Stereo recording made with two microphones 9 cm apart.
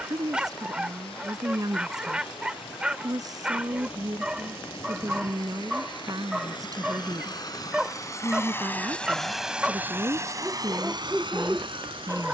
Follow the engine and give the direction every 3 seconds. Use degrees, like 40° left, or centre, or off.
70° left, 70° left, 40° left, 30° right.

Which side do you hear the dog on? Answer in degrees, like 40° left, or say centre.
10° right.